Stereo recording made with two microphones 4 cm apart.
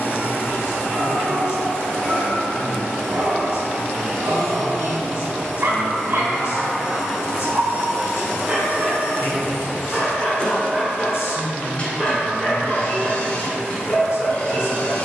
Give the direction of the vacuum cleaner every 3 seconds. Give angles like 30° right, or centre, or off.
20° left, centre, 20° right, 20° left, 30° left.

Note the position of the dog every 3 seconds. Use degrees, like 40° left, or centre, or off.
60° right, 60° right, 30° right, centre, 20° left.